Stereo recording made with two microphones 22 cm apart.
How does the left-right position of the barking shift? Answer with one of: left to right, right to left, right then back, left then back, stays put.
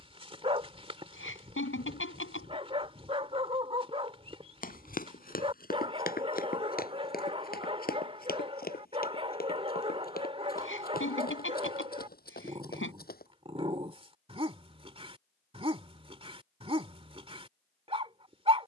stays put.